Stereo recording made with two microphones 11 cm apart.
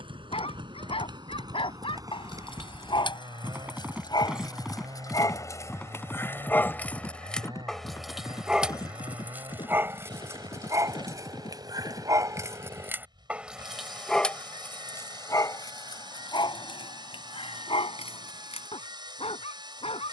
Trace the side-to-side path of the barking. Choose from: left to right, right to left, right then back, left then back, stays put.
right then back.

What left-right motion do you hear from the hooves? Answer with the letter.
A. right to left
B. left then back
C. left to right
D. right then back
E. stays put
A.